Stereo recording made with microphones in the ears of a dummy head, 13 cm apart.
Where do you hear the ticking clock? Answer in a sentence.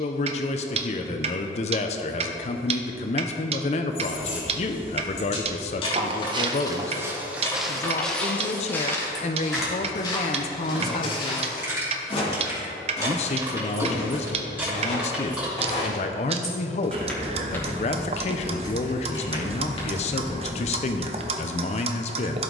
You can hear the ticking clock on the right.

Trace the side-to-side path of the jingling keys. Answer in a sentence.
You can hear the jingling keys go right and come back.